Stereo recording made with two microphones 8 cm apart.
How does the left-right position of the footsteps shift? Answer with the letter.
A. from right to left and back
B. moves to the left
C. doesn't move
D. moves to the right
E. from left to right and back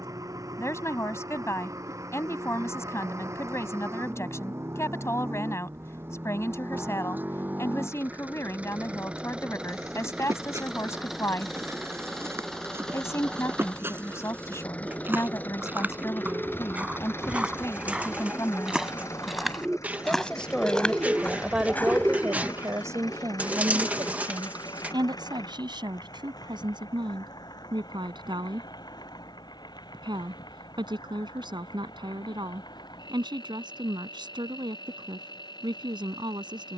B.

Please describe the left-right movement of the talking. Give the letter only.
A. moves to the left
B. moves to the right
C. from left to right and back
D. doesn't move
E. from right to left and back
B.